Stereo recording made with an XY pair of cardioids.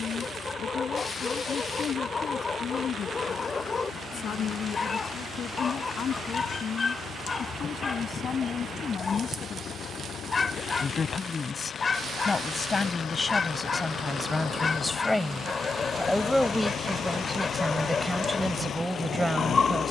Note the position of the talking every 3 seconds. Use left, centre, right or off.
left, left, left, left, left, centre, centre.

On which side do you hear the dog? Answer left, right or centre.
left.